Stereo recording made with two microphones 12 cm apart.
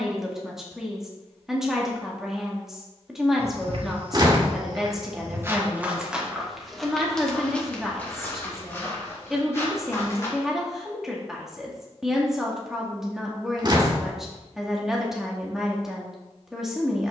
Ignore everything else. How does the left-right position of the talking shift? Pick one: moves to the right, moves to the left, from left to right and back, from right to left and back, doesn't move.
doesn't move.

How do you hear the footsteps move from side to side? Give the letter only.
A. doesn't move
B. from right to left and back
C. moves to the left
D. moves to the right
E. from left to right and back
C.